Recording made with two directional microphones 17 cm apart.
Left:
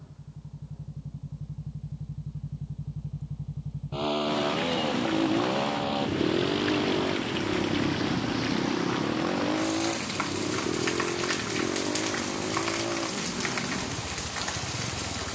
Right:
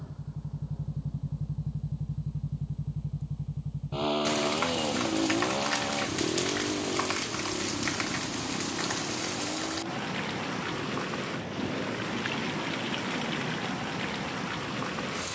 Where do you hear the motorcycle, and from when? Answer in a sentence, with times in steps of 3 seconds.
In this clip you hear the motorcycle on the right from 0 s, in the centre from 3 s and on the left from 6 s.